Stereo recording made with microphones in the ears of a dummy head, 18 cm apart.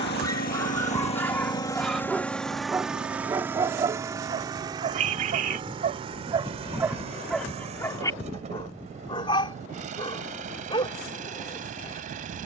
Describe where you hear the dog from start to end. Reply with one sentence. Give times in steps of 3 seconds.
You can hear the dog in the centre from 0 s, on the right from 3 s, in the centre from 6 s and on the left from 9 s.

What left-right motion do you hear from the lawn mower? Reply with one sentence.
You can hear the lawn mower travel towards the right.